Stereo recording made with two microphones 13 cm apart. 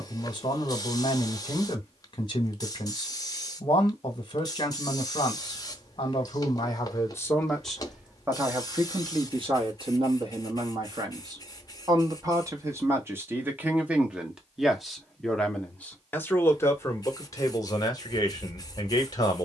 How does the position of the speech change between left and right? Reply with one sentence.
You can hear the speech move from left to right and back again.